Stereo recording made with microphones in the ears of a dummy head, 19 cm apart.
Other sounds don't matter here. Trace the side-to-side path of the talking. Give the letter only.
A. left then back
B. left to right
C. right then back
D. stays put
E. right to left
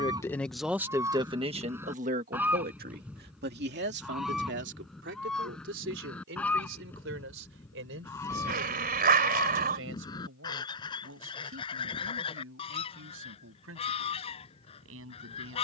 B.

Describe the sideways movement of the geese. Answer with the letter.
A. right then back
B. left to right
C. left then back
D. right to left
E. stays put
D.